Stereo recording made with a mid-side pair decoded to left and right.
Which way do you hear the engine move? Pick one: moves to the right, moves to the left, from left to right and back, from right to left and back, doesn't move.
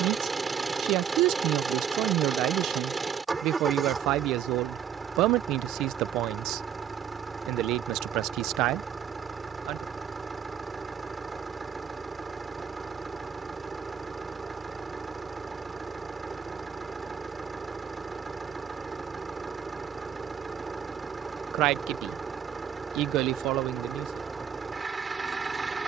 doesn't move.